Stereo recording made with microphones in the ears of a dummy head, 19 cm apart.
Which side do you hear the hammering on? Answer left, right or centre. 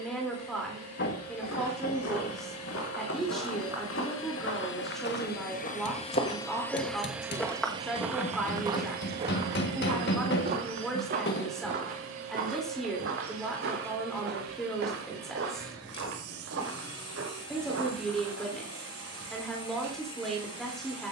left.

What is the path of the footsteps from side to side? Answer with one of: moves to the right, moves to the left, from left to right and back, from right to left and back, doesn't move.
moves to the right.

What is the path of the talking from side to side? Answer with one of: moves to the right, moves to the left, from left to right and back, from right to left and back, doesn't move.
doesn't move.